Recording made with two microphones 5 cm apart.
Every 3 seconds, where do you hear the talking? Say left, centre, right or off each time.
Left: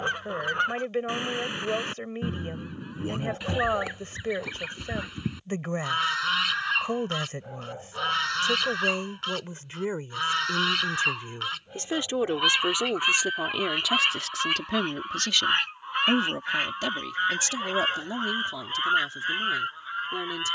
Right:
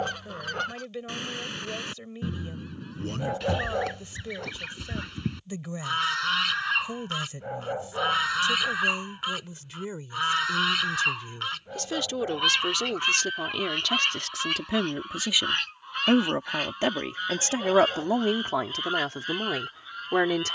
left, left, left, left, centre, right, right.